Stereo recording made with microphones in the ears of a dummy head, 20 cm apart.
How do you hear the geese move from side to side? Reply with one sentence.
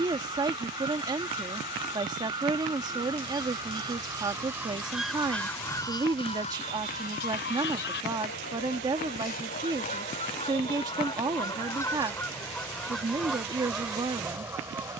You can hear the geese move from right to left and back again.